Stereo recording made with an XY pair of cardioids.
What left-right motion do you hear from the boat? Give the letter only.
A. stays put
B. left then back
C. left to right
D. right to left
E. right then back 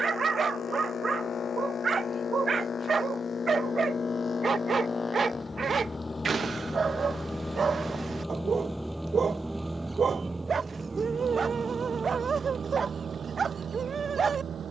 C.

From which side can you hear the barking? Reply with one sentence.
In this clip you hear the barking on the right.